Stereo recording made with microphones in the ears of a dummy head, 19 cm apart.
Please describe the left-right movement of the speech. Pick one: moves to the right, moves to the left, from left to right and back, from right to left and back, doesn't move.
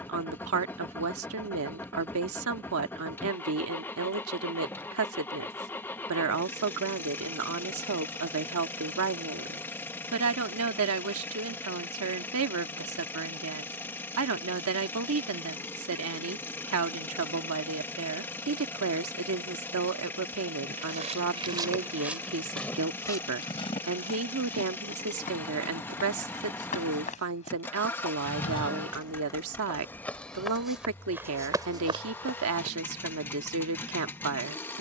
doesn't move.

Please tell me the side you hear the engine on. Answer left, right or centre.
centre.